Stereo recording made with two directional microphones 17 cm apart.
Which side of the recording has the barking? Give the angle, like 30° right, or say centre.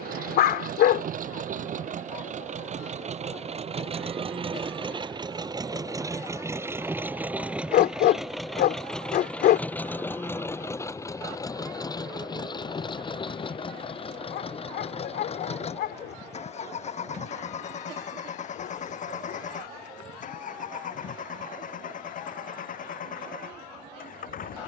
70° left.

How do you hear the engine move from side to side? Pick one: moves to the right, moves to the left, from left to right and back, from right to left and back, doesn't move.
moves to the left.